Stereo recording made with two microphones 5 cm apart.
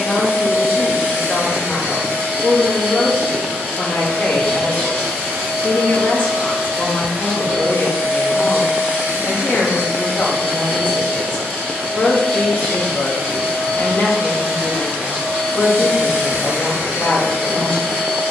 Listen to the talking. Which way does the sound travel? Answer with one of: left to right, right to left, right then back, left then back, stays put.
stays put.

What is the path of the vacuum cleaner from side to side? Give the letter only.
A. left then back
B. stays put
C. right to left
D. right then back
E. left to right
B.